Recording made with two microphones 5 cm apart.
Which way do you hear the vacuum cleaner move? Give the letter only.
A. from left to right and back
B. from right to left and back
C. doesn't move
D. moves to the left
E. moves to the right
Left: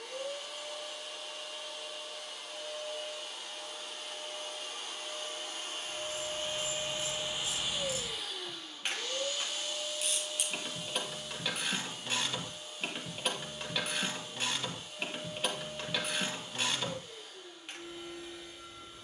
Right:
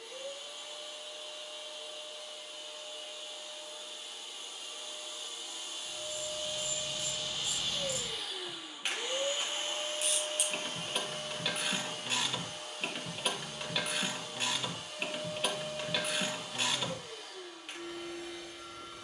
E.